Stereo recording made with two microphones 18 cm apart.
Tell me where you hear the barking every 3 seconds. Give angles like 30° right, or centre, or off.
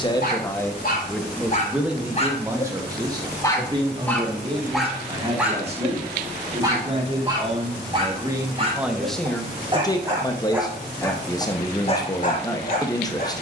50° left, centre, 30° right, 10° right, 50° left.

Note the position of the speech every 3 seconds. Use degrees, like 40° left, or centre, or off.
centre, 30° right, 30° right, 20° left, 20° left.